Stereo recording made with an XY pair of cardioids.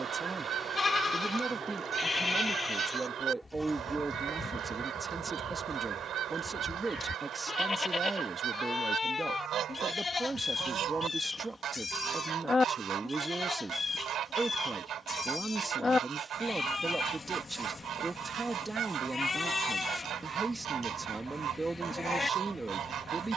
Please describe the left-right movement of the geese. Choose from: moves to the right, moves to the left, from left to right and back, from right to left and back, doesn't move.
doesn't move.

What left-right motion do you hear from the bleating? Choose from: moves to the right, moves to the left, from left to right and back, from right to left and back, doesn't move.
doesn't move.